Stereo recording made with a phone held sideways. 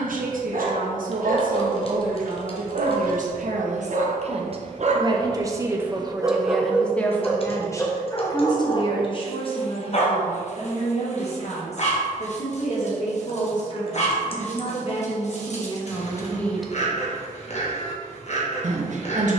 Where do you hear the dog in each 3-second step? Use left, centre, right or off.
right, right, centre, left, left, left, left.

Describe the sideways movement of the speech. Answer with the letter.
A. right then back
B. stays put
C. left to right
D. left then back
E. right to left
D.